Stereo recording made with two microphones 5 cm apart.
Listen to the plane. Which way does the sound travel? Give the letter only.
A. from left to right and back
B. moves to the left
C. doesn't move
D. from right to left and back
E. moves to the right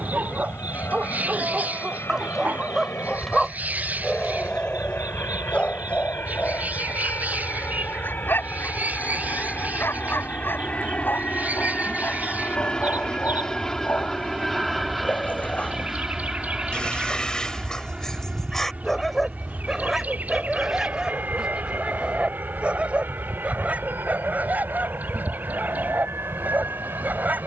E.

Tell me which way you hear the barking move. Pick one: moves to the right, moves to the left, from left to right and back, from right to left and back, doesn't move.
from right to left and back.